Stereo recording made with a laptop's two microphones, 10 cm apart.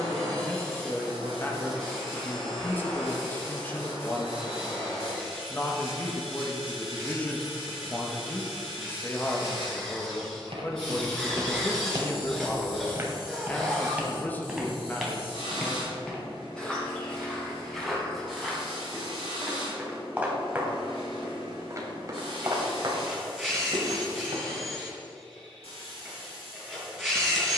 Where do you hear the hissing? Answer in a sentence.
In this clip you hear the hissing on the left.